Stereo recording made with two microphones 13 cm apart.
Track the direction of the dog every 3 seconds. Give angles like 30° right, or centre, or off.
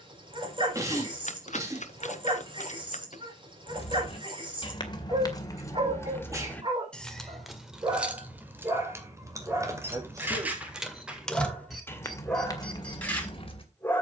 40° right, 40° right, 30° right, 10° right, 10° left.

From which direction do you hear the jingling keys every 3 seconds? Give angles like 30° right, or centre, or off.
off, 30° left, centre, 10° right, 30° left.